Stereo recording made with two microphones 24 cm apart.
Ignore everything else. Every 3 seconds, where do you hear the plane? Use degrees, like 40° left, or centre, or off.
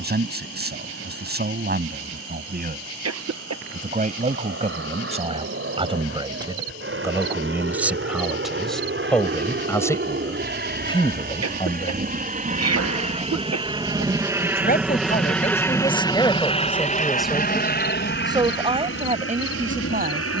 70° right, 60° right, 60° right, 50° right, 20° right, 20° left, 50° left.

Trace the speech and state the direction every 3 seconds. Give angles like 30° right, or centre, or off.
40° right, 30° right, 10° right, 20° left, 40° left, 10° left, 30° right.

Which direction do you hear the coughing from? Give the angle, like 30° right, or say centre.
80° right.